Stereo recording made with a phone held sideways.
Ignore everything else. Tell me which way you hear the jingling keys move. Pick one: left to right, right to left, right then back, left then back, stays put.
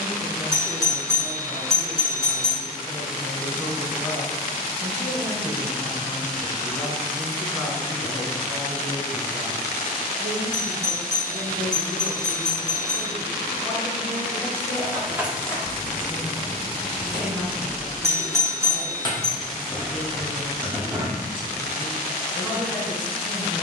left then back.